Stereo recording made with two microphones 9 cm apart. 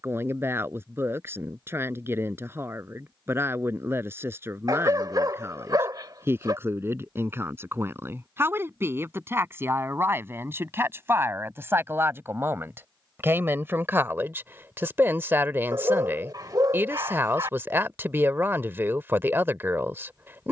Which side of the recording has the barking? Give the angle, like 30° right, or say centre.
40° right.